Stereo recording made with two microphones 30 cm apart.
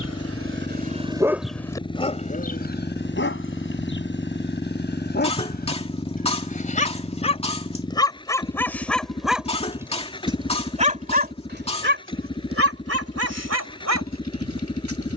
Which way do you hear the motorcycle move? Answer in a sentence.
In this clip you hear the motorcycle stay in one place.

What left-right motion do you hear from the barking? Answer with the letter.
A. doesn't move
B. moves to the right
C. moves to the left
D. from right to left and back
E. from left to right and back
D.